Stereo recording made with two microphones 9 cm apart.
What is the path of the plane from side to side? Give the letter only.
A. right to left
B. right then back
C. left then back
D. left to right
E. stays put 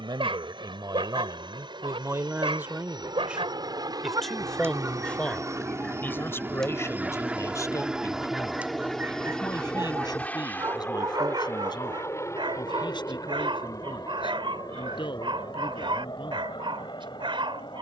A.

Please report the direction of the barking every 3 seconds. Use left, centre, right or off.
right, right, centre, right, right, right.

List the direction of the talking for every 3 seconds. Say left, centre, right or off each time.
right, centre, left, left, left, left.